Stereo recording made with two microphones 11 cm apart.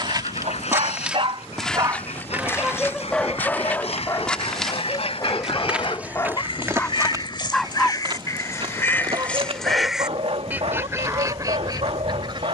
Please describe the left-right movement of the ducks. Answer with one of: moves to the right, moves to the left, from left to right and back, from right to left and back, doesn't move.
moves to the right.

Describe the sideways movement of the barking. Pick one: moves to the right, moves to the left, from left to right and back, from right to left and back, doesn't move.
from right to left and back.